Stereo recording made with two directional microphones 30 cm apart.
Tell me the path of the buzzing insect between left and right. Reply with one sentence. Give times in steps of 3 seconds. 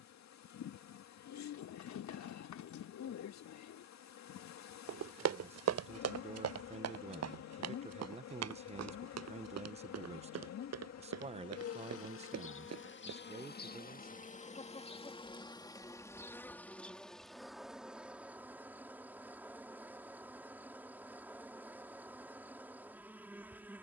You can hear the buzzing insect on the left from 0 s and in the centre from 15 s.